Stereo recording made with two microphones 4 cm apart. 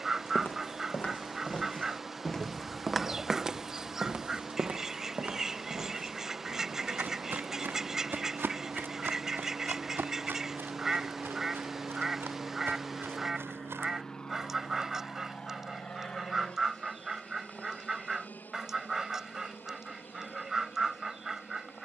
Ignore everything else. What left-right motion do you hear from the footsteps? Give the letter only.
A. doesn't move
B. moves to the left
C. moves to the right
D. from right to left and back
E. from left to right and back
C.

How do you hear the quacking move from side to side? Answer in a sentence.
In this clip you hear the quacking stay in one place.